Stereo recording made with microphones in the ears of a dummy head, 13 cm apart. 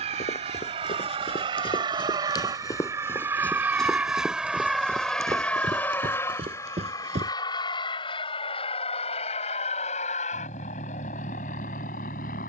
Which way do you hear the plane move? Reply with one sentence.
You can hear the plane move from right to left.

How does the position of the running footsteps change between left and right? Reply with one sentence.
In this clip you hear the running footsteps travel towards the right.